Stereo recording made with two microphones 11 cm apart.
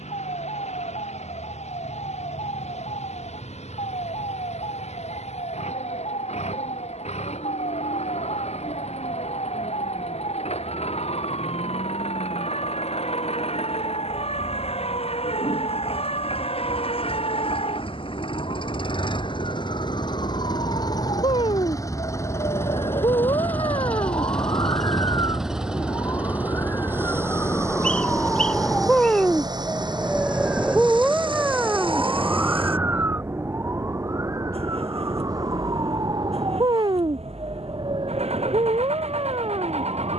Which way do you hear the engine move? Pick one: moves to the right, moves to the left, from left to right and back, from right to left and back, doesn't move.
moves to the right.